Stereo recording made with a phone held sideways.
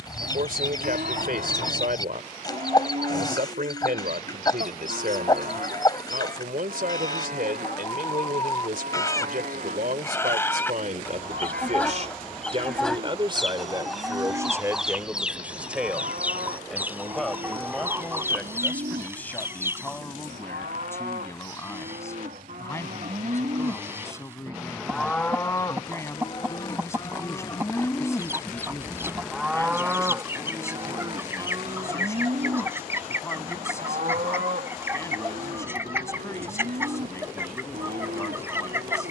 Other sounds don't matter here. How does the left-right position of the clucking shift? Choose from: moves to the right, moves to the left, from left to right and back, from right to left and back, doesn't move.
moves to the right.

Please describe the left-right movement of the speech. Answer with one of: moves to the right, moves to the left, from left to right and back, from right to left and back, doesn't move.
moves to the left.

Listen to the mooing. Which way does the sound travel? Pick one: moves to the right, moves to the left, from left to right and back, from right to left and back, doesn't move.
from right to left and back.